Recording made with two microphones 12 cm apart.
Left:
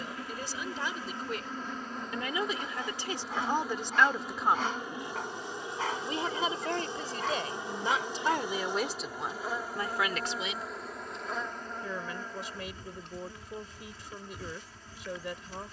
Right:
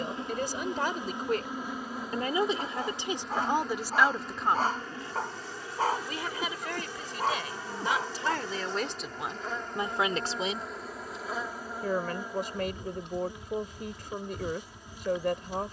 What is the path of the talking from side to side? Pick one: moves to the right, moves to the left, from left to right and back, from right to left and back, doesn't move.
from right to left and back.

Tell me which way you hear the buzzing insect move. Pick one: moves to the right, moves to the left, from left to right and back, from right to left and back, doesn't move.
from right to left and back.